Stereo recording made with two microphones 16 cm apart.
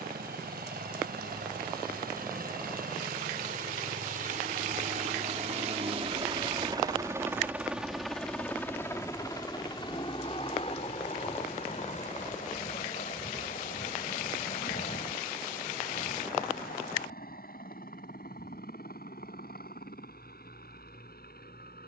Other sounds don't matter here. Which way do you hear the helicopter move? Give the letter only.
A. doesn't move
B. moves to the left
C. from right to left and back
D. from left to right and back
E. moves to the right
B.